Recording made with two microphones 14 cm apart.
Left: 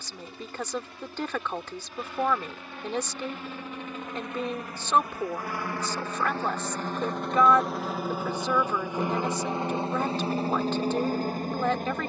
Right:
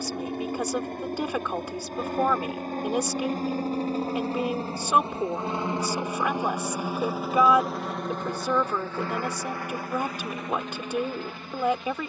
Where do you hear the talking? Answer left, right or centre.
centre.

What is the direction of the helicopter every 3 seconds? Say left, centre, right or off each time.
right, right, centre, left.